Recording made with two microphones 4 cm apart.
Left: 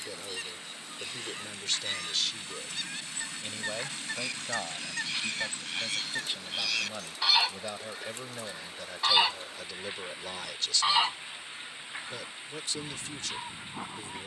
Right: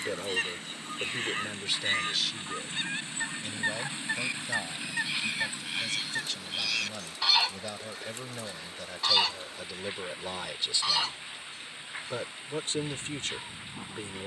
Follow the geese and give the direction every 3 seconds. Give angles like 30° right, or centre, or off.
40° right, 20° right, centre, 30° left, 30° left.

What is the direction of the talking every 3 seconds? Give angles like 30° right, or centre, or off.
20° right, 20° left, 10° left, 10° right, 40° right.